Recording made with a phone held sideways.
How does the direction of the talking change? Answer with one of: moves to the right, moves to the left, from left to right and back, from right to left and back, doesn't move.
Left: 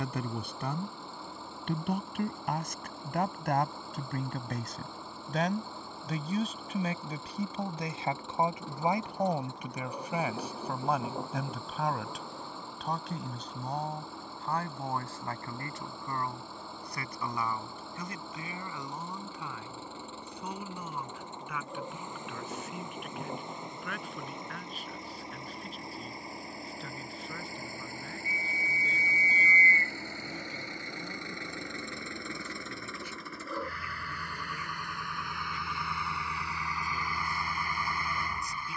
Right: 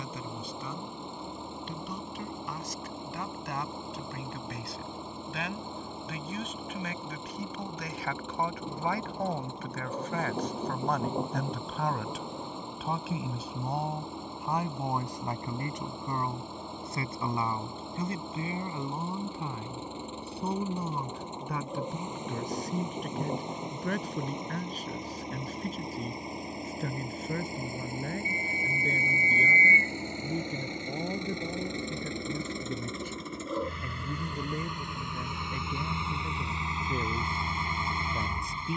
moves to the right.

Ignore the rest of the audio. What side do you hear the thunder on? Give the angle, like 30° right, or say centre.
20° right.